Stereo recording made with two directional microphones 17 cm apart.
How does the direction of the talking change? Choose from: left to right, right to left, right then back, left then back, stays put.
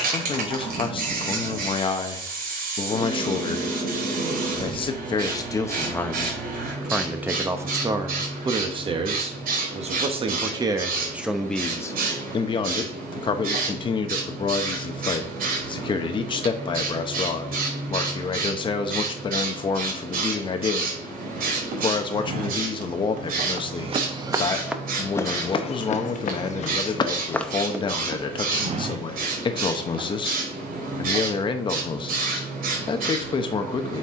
right then back.